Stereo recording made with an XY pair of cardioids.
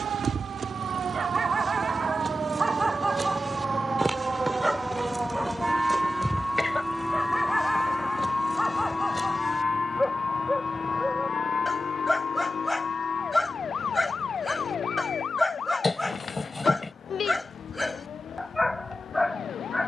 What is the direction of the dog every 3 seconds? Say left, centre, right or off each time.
right, centre, centre, centre, centre, centre, centre.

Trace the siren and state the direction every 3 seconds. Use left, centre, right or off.
right, right, centre, left, left, left, left.